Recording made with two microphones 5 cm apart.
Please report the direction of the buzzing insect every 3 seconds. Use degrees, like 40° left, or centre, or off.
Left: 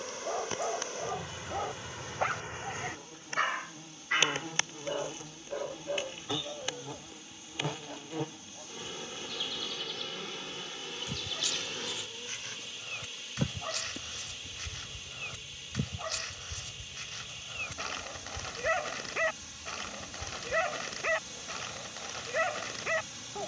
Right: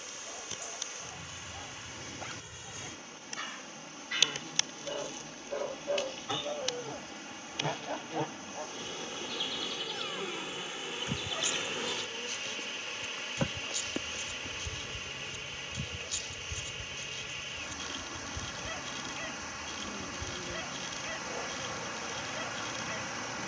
50° left, 30° left, 10° left, 10° right, 30° right, 40° right, 50° right, 50° right.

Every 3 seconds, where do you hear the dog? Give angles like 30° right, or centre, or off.
60° left, 20° left, 30° right, 30° right, 60° left, 60° left, 60° left, 60° left.